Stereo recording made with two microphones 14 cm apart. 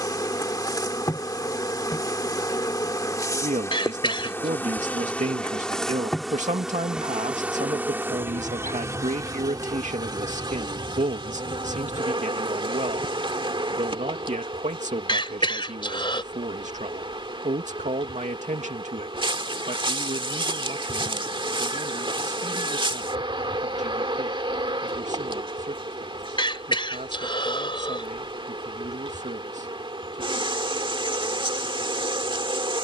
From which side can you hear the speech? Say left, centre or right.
right.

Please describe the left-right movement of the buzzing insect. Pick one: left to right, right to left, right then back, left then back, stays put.
left to right.